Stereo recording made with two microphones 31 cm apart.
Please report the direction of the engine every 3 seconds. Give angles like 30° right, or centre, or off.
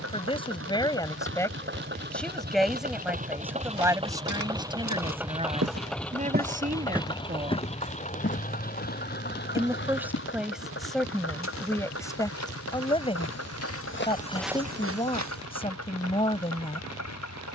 40° right, 10° right, 20° left, 40° left, 50° left, 60° left.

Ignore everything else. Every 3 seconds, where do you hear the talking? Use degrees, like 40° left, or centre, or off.
10° left, 10° right, 30° right, centre, 20° left, 20° left.